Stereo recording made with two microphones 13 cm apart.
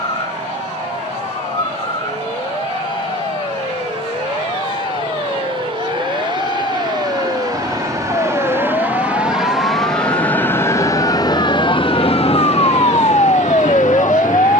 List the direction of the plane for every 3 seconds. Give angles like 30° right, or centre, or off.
60° right, 50° right, 30° right, 20° left, 60° left.